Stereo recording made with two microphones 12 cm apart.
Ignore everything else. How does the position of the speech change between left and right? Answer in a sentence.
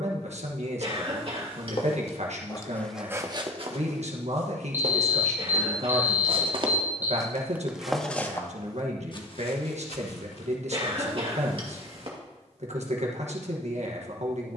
In this clip you hear the speech stay put.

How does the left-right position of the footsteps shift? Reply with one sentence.
In this clip you hear the footsteps move from left to right and back again.